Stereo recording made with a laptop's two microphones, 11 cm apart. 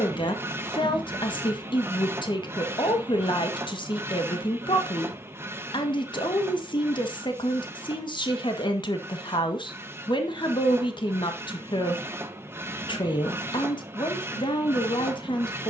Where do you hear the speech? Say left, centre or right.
left.